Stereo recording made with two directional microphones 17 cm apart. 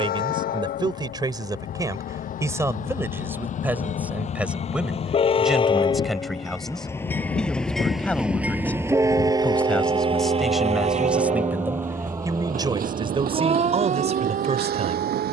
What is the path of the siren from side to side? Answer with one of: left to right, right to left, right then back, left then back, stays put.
left to right.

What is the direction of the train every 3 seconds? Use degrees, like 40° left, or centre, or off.
60° left, 40° left, 10° left, 30° right, 60° right.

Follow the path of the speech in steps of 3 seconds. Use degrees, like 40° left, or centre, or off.
20° right, 10° right, 10° left, centre, 30° right.